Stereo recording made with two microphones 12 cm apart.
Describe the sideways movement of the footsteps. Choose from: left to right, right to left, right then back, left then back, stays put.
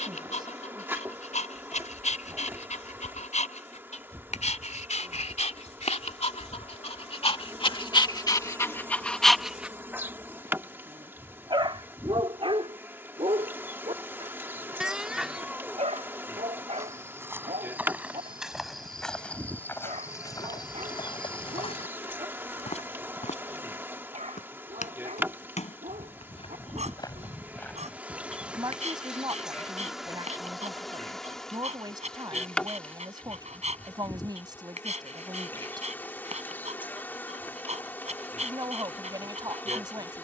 left then back.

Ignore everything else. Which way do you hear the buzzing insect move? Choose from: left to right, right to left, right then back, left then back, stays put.
right to left.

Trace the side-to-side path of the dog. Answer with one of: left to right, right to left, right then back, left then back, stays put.
left to right.